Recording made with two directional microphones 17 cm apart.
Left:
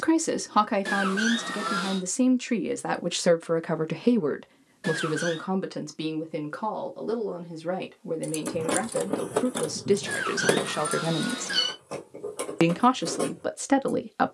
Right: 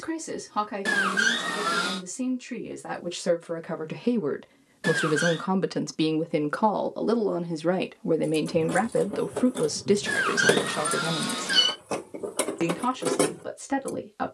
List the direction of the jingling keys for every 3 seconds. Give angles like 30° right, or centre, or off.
off, off, 60° left, 20° left, 50° right.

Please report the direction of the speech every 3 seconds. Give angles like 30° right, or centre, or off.
50° left, 10° left, 40° right, centre, 40° left.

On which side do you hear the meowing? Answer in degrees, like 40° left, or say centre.
20° right.